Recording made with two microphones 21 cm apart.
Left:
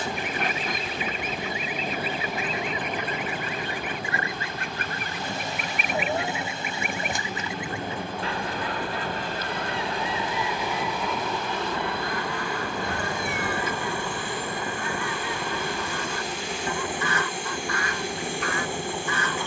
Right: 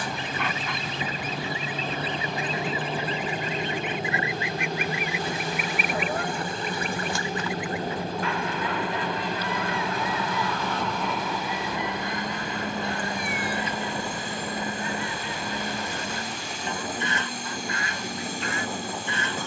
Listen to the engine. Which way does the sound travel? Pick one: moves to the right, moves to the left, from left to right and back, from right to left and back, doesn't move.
doesn't move.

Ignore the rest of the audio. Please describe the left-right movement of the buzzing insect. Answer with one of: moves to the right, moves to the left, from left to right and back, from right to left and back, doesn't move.
from left to right and back.